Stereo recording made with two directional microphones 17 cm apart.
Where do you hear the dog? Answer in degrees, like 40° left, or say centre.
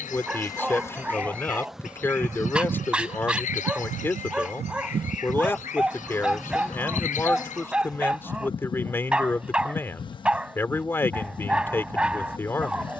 10° right.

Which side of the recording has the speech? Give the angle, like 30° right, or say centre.
10° left.